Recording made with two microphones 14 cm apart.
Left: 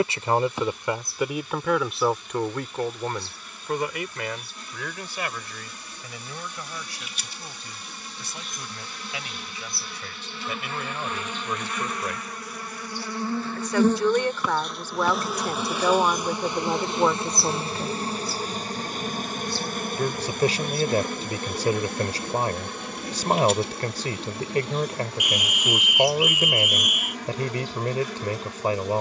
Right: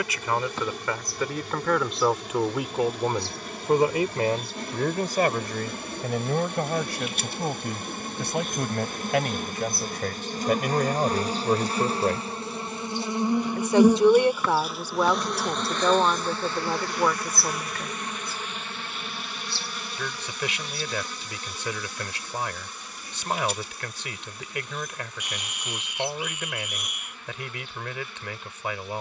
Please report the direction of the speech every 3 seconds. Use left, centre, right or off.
centre, right, right, right, right, centre, left, left, left, left.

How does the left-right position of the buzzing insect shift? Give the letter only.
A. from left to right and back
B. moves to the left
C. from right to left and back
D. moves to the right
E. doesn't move
B.